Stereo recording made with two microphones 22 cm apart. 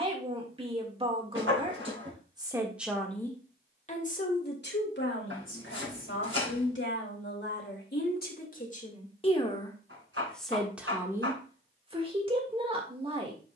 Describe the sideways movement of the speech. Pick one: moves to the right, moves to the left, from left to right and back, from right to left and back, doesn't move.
from right to left and back.